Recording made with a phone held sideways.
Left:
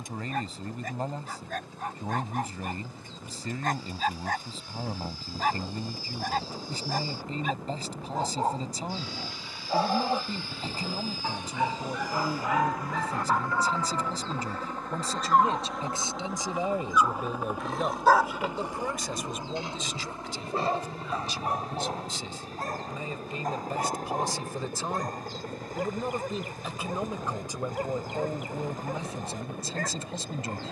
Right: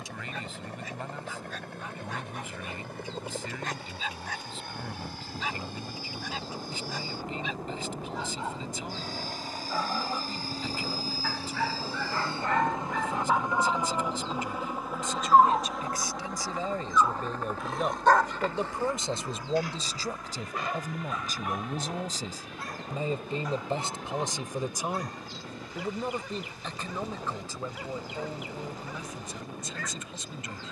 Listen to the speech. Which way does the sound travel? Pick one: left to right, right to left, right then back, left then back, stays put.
right then back.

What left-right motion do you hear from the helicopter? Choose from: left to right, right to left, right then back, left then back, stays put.
right to left.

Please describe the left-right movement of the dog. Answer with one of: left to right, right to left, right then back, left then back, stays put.
right then back.